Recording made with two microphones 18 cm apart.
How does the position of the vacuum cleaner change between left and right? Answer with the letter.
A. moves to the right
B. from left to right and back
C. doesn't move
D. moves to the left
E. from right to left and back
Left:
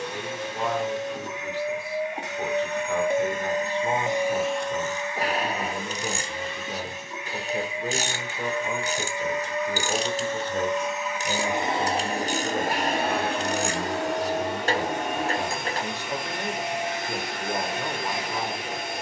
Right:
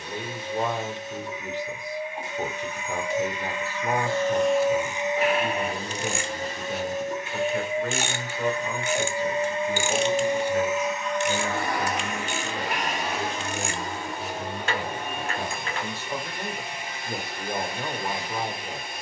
B.